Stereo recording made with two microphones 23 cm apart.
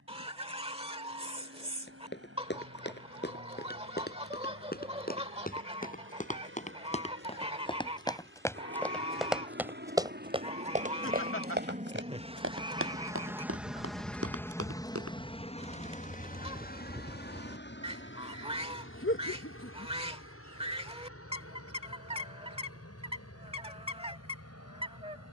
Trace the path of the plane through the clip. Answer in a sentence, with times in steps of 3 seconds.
In this clip you hear the plane on the right from 0 s, in the centre from 12 s and on the left from 15 s.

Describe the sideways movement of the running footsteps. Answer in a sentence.
You can hear the running footsteps move to the right.